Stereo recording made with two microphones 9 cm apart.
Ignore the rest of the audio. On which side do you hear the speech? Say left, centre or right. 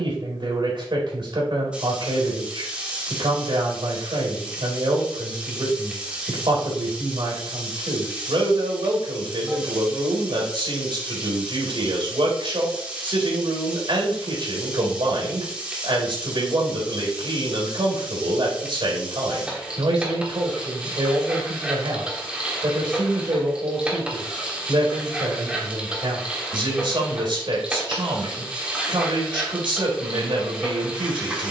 right.